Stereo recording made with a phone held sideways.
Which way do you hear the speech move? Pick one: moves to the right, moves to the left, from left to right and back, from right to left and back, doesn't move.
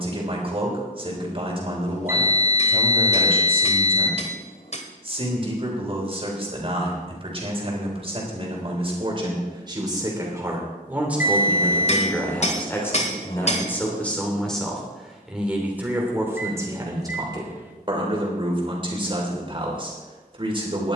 from right to left and back.